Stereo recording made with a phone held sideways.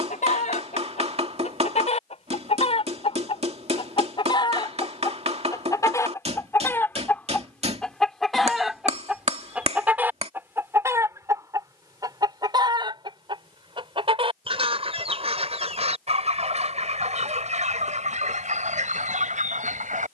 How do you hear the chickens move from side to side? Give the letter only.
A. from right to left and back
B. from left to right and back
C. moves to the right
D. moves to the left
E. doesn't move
C.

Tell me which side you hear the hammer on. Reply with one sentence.
In this clip you hear the hammer on the right.